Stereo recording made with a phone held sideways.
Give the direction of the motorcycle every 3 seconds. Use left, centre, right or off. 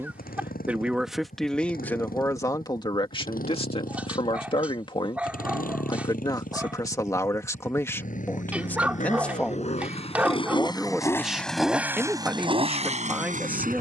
left, left, left, left, right.